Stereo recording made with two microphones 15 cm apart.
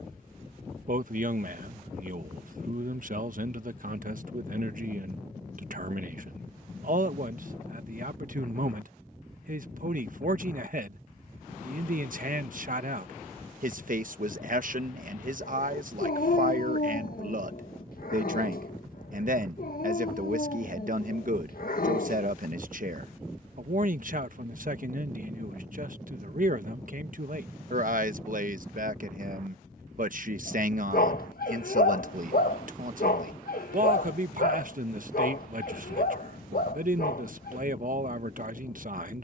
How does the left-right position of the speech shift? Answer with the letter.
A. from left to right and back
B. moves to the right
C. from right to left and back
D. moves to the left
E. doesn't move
E.